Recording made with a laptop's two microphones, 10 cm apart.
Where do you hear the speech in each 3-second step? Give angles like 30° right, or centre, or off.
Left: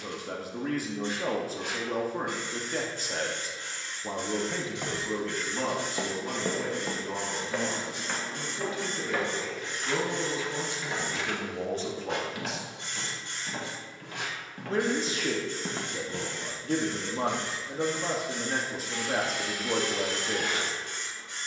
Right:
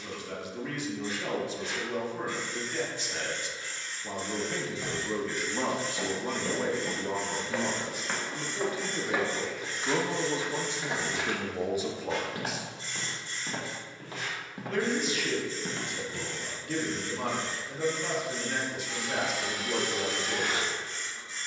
40° left, 10° left, 40° right, 20° right, 10° left, 40° left, 40° left.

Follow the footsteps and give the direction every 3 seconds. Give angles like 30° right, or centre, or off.
off, 50° left, 10° left, 30° right, 30° right, 30° left, off.